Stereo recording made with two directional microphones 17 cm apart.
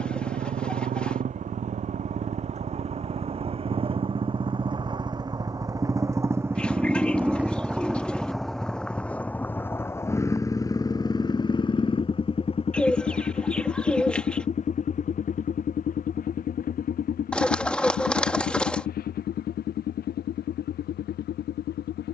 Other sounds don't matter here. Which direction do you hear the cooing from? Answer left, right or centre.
centre.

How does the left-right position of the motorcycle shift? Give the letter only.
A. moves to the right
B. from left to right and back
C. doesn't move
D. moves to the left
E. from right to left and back
D.